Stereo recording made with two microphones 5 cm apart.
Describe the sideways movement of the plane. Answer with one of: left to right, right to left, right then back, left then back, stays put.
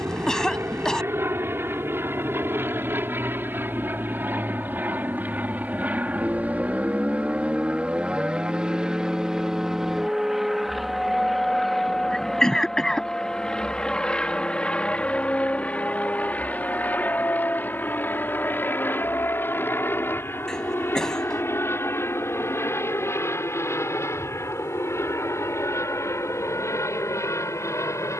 right to left.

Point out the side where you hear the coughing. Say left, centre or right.
centre.